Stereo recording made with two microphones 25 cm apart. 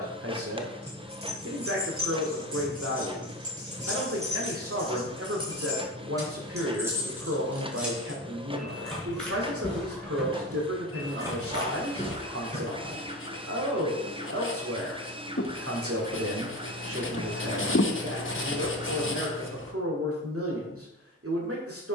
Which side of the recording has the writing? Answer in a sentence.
You can hear the writing on the left.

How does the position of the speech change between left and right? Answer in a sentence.
In this clip you hear the speech stay in one place.